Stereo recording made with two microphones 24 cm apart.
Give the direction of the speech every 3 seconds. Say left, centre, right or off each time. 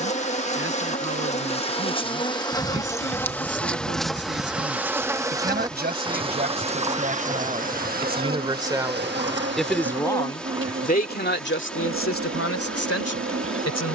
right, right, right, left, left.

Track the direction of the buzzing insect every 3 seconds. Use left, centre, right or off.
left, centre, right, right, right.